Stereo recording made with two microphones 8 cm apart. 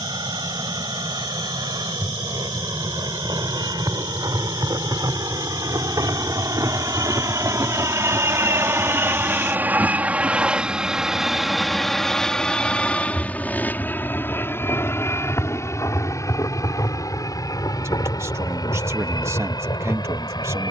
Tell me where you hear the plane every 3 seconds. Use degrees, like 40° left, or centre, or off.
70° right, 60° right, 40° right, 10° right, 20° left, 40° left, 50° left.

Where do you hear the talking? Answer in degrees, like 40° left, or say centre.
30° right.